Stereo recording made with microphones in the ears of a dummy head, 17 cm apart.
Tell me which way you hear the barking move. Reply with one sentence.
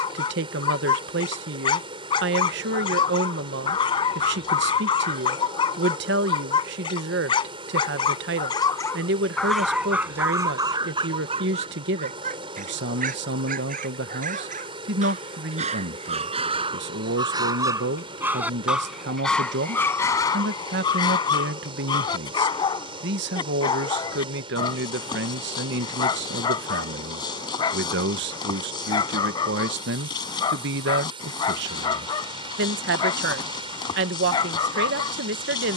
In this clip you hear the barking move from left to right and back again.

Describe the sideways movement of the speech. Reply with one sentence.
You can hear the speech stay in one place.